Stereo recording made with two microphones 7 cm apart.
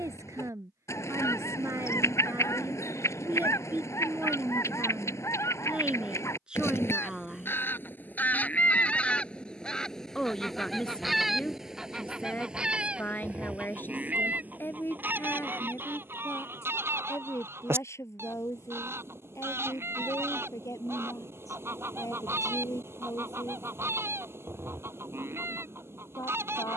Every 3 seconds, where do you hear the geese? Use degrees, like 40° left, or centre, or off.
40° left, 40° left, 30° left, centre, 20° right, 30° right, 40° right, 40° right, 40° right.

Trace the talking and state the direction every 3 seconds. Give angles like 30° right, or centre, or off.
40° right, 20° right, 10° right, 10° left, 30° left, 40° left, 40° left, 50° left, 60° left.